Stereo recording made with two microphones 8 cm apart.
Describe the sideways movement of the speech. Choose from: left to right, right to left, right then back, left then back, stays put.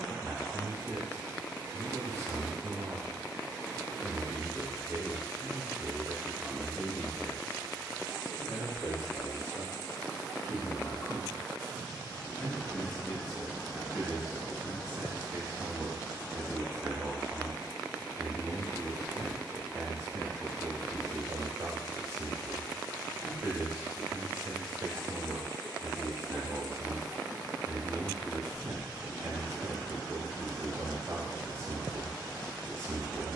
left then back.